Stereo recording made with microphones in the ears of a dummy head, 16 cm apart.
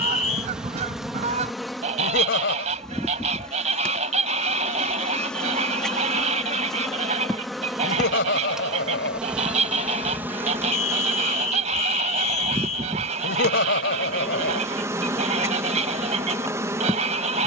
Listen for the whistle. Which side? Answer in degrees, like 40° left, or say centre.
40° left.